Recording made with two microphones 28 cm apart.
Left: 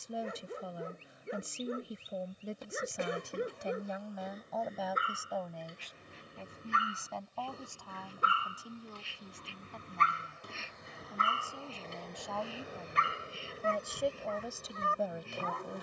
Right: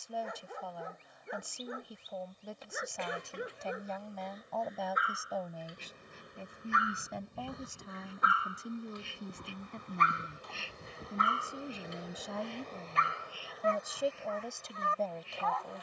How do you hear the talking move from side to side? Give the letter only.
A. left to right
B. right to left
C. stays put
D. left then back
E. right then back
E.